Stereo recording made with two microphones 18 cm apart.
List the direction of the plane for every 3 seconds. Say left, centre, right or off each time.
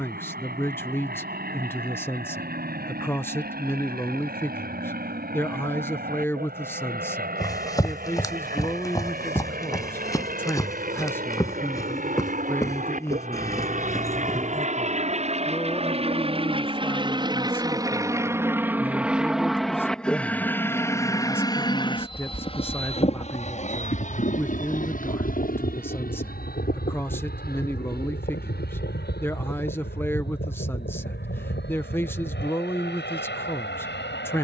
right, right, right, right, right, right, centre, left, left, left, left, left.